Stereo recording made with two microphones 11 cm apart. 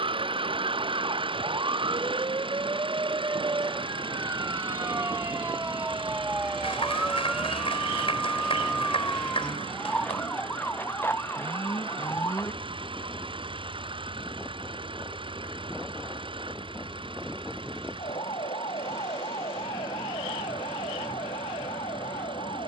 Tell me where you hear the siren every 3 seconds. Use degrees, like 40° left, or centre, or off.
40° right, 20° right, centre, 20° left, 30° left, 40° left, 50° left, 60° left.